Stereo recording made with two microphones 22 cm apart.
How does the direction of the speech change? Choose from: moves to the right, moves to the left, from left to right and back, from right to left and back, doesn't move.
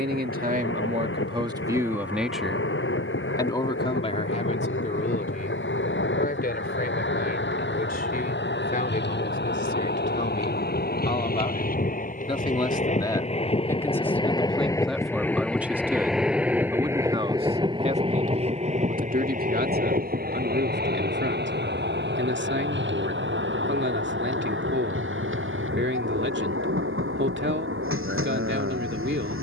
from right to left and back.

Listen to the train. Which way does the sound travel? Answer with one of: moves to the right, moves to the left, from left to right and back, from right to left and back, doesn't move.
moves to the right.